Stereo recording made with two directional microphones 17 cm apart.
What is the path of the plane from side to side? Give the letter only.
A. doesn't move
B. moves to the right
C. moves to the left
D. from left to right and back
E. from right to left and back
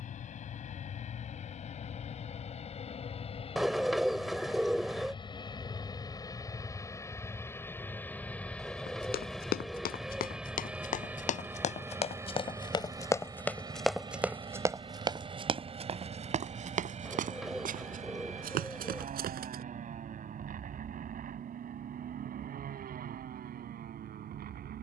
B.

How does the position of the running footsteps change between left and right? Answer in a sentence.
You can hear the running footsteps travel towards the right.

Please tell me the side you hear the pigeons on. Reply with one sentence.
You can hear the pigeons in the centre.